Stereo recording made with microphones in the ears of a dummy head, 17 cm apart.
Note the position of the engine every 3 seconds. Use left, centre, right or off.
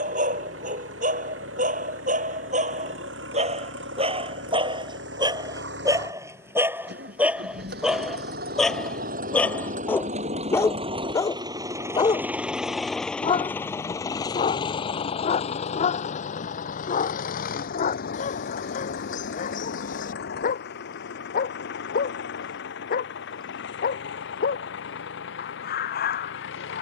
right, right, right, right, centre, left, left, left, left.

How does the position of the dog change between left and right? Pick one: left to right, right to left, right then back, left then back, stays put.
right to left.